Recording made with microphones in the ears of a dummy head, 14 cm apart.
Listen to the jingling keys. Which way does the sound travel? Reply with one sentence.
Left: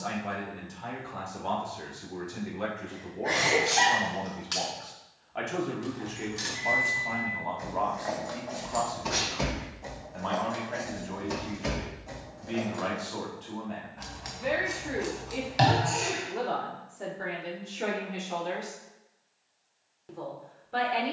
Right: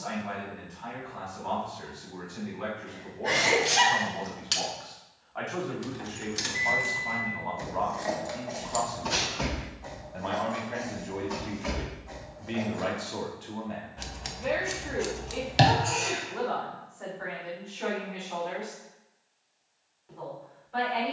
In this clip you hear the jingling keys go from the right side to the left.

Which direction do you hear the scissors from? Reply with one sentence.
You can hear the scissors on the right.